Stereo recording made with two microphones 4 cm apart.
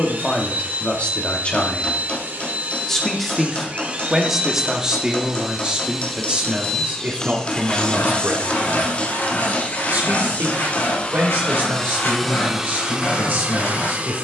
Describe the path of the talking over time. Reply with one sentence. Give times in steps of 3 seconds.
In this clip you hear the talking on the left from 0 s, in the centre from 3 s and on the right from 6 s.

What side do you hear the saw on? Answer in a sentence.
You can hear the saw on the left.